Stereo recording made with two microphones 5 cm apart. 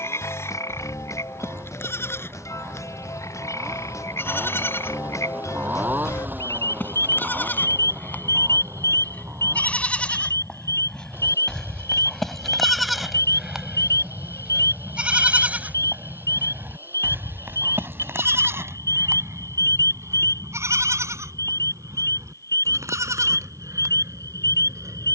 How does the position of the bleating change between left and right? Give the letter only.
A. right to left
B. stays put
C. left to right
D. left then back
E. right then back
C.